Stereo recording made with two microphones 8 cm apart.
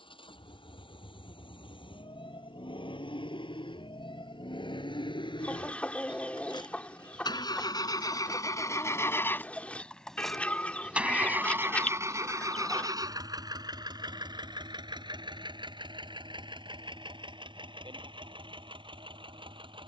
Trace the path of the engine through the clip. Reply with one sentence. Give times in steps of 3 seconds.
You can hear the engine on the left from 0 s, in the centre from 9 s and on the right from 12 s.